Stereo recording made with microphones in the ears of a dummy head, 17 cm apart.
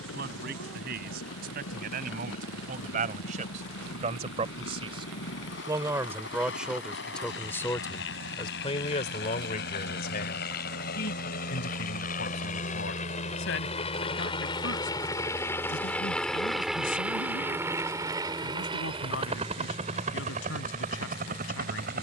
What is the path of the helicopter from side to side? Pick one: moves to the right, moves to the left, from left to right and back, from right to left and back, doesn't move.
moves to the right.